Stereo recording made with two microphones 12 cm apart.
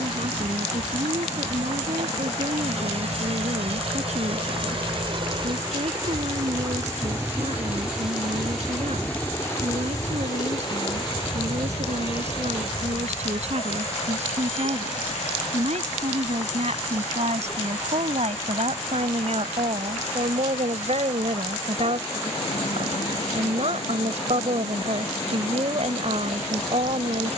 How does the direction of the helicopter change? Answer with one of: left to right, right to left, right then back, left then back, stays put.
right to left.